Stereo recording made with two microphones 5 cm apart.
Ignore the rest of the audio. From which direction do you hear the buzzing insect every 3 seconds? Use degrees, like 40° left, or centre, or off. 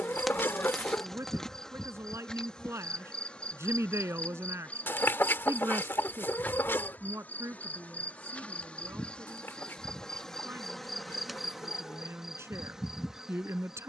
10° left, 30° left, 30° left, 10° left, 10° right.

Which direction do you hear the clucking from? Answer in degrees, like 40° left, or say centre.
50° left.